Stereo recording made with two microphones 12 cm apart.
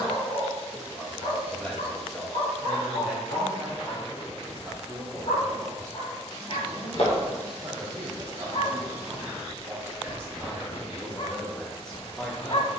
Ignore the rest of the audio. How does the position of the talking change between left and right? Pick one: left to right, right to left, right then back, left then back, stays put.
right then back.